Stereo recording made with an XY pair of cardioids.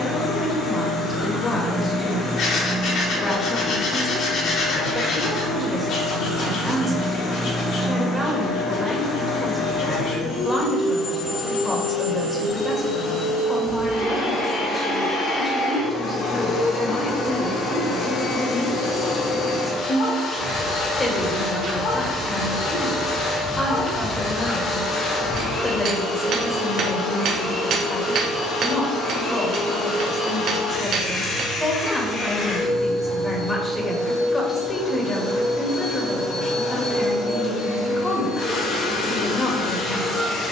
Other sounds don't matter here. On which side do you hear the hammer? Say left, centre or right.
right.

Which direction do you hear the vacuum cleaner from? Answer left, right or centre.
left.